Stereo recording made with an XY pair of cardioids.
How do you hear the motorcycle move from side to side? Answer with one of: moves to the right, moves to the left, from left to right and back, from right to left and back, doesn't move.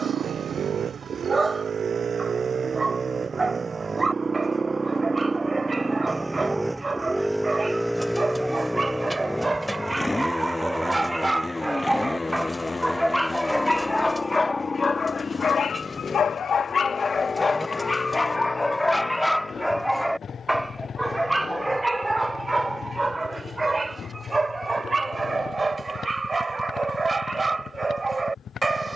moves to the left.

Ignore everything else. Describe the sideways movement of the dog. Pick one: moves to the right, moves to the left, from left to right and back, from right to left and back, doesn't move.
from right to left and back.